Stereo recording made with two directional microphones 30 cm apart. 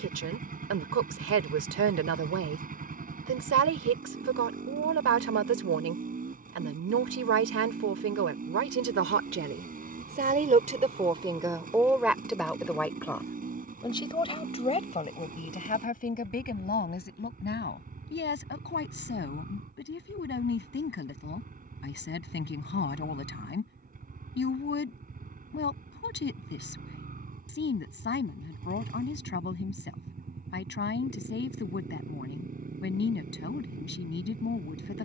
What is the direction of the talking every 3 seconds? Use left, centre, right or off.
right, right, right, right, centre, left, left, left, left, left, left, left.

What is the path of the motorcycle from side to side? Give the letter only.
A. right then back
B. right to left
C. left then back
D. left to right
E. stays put
E.